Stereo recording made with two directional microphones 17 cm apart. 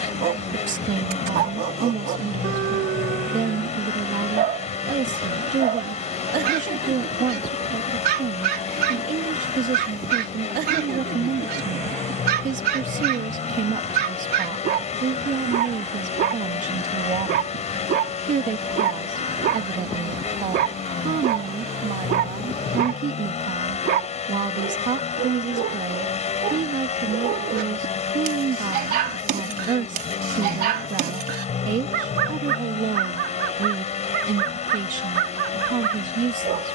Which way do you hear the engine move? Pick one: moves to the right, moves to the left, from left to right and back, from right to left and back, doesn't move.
doesn't move.